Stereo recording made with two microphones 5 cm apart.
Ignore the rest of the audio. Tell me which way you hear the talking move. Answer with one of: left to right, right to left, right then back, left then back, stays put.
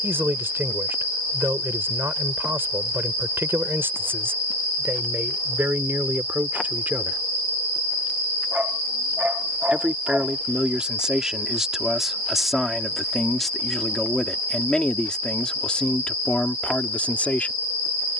right to left.